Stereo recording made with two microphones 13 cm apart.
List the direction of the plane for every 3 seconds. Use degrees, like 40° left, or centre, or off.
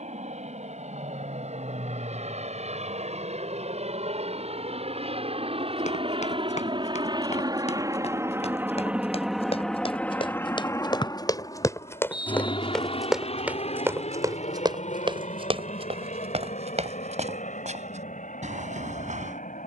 70° right, 60° right, 30° right, 20° left, 50° left, 60° left, 70° left.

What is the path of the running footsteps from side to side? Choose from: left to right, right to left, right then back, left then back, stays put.
left to right.